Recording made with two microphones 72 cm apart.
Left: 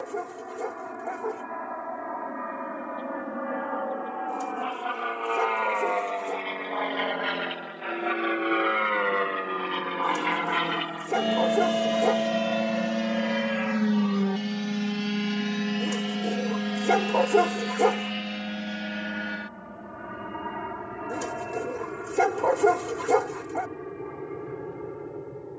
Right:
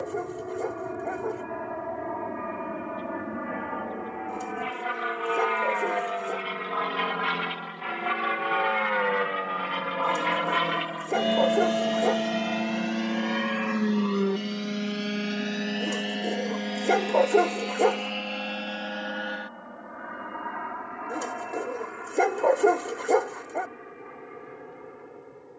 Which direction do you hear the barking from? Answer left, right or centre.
left.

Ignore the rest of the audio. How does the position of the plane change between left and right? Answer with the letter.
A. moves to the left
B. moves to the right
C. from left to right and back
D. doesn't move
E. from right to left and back
A.